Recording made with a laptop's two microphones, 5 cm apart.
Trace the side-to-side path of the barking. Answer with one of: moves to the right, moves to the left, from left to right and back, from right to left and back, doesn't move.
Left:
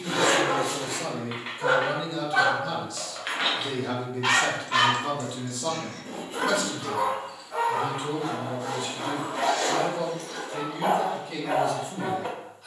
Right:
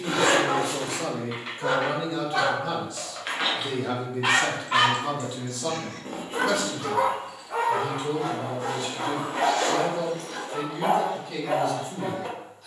from left to right and back.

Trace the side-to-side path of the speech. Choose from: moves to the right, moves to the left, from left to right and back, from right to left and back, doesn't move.
moves to the left.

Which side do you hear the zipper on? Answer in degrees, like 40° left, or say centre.
50° right.